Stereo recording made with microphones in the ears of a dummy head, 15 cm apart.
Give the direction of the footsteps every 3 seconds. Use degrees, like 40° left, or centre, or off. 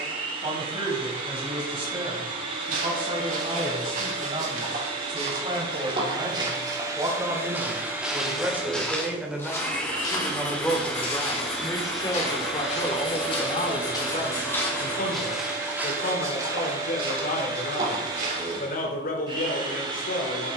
50° right, 40° right, 10° right, 20° left, 30° left, 20° right, 50° right.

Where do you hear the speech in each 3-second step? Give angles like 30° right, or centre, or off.
30° right, 30° right, 20° right, 10° left, 40° left, 60° left, 60° left.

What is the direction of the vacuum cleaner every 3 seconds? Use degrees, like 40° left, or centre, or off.
30° right, 30° right, 20° right, centre, 10° right, 20° right, 30° right.